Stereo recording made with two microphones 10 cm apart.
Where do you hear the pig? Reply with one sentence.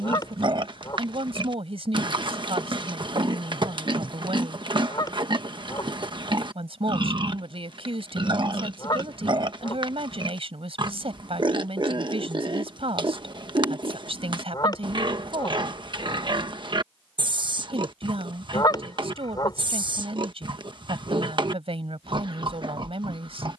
In this clip you hear the pig on the right.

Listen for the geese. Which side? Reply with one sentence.
You can hear the geese on the left.